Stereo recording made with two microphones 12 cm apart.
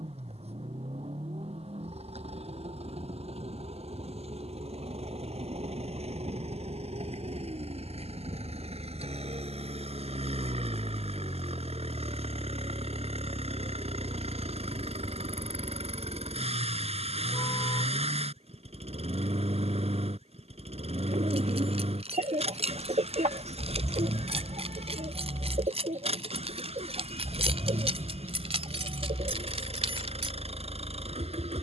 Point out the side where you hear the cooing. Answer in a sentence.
In this clip you hear the cooing on the right.